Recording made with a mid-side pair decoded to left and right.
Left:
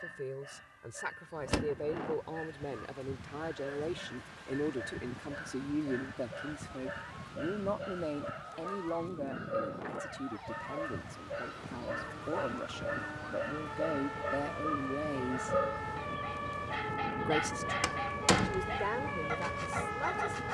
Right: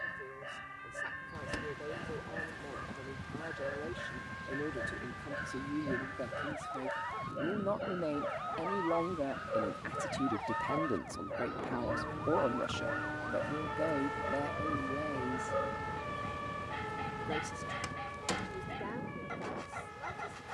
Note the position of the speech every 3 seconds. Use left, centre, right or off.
left, left, centre, right, centre, left, left.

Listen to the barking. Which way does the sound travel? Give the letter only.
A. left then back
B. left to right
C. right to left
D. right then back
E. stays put
C.